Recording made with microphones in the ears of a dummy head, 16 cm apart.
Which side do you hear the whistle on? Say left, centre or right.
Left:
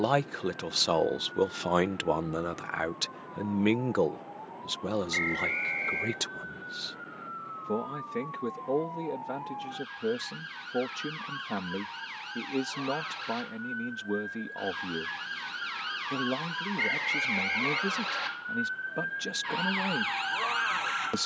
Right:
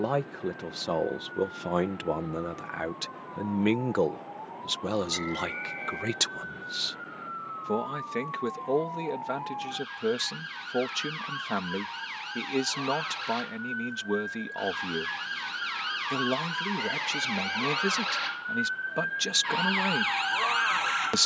left.